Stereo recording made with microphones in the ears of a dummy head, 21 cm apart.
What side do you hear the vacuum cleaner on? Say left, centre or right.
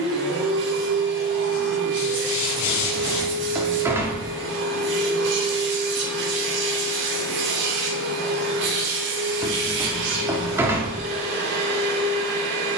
right.